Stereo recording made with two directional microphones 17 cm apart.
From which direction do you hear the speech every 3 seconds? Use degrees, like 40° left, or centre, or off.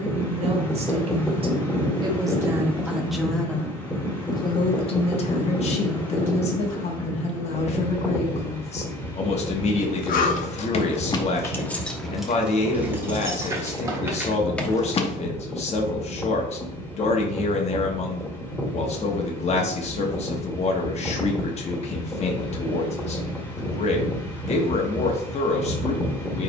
30° right, 30° left, 40° left, 40° left, 40° left, 40° left, 40° left, 40° left, 40° left.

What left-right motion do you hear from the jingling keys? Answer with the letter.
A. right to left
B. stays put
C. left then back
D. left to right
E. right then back
E.